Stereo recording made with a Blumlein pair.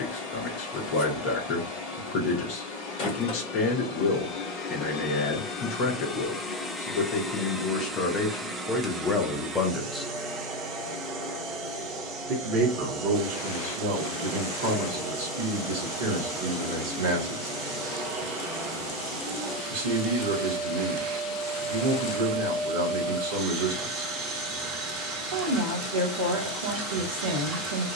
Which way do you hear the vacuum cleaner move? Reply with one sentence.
You can hear the vacuum cleaner go from the left side to the right.